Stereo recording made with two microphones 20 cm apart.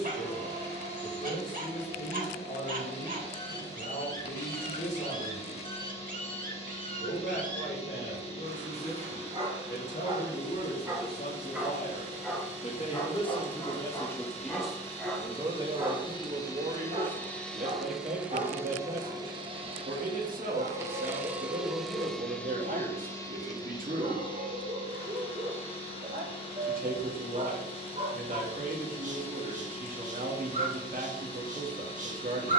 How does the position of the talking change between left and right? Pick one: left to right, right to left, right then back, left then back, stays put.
left to right.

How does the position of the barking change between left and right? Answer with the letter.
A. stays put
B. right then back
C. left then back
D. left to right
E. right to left
C.